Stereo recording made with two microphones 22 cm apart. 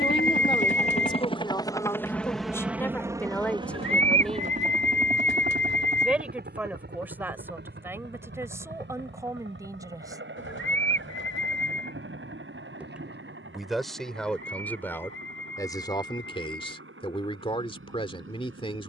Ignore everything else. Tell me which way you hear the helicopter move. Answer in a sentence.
You can hear the helicopter go from the left side to the right.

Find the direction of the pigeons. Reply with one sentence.
You can hear the pigeons on the left.